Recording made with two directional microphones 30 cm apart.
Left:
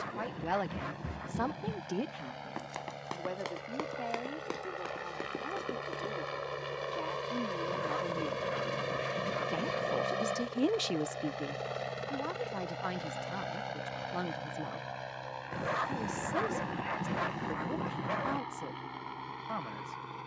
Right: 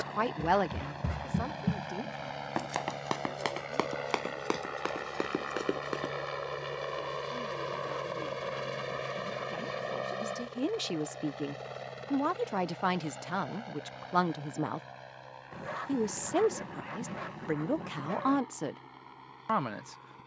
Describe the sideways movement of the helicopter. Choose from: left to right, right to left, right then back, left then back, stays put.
right to left.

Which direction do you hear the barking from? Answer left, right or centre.
left.